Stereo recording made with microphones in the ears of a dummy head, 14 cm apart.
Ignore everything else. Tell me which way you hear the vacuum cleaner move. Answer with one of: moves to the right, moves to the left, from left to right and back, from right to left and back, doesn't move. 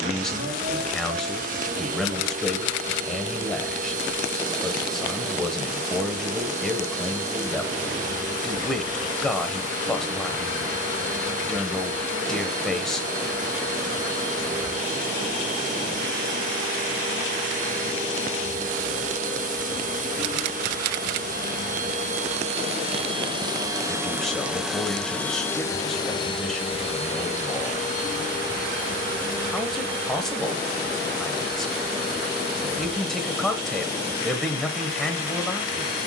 moves to the left.